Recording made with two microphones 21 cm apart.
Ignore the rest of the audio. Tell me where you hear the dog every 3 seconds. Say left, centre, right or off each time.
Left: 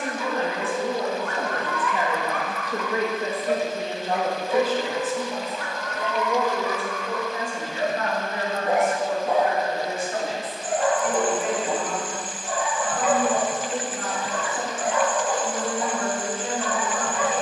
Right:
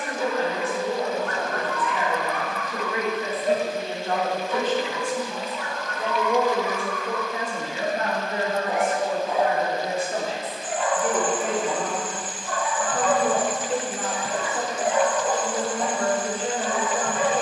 right, left, left, left, centre, right.